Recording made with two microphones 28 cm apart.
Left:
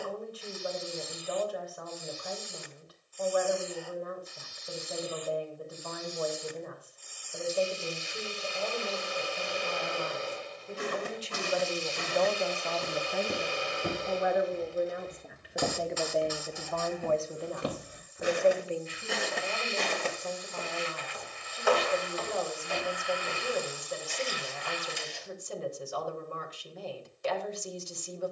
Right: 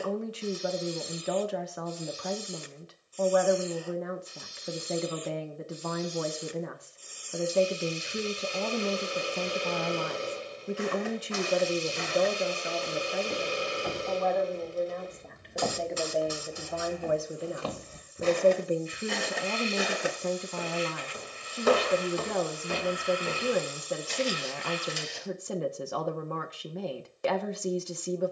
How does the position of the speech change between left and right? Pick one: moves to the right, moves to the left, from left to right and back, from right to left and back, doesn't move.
from right to left and back.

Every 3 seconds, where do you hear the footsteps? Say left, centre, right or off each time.
off, off, off, left, left, left, centre, right, right, off.